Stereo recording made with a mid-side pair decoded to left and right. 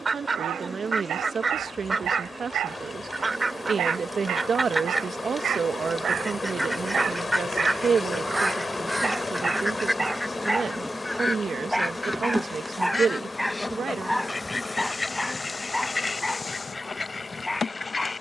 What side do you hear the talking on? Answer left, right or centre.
right.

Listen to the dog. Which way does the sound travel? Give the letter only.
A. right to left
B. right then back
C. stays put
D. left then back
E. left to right
A.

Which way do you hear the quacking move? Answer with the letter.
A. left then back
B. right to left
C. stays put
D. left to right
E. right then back
B.